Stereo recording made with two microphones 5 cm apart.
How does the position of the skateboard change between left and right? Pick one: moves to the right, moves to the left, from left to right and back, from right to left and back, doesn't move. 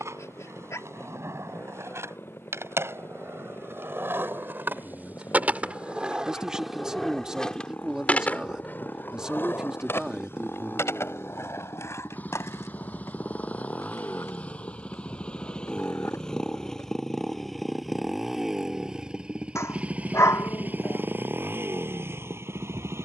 moves to the left.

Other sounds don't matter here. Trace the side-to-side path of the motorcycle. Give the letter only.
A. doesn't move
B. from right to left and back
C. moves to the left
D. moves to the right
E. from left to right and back
D.